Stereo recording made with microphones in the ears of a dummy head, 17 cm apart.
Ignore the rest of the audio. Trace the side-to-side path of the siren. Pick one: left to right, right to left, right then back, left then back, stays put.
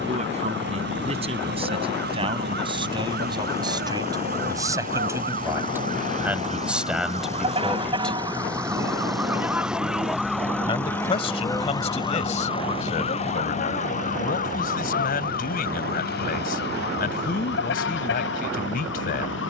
right to left.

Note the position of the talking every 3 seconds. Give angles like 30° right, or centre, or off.
30° right, 20° right, centre, 30° left, 40° left, 50° left, 50° left.